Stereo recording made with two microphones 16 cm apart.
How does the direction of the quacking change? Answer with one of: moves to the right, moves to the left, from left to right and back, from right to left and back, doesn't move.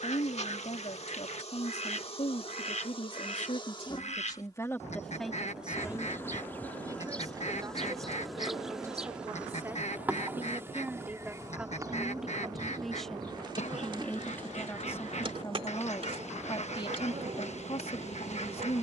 doesn't move.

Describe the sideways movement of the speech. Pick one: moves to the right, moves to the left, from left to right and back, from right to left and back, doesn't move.
from left to right and back.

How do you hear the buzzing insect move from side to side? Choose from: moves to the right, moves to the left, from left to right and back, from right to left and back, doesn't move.
moves to the right.